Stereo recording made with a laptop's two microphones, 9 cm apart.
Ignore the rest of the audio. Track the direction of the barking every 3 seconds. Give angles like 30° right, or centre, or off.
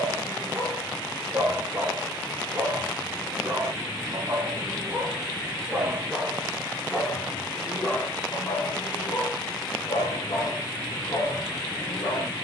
40° right, 30° right, 20° left, 50° left.